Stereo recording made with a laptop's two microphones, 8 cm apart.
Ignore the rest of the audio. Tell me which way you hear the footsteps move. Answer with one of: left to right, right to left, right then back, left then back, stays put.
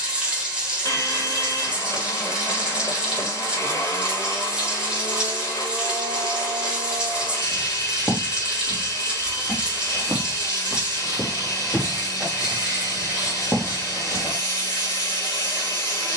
left then back.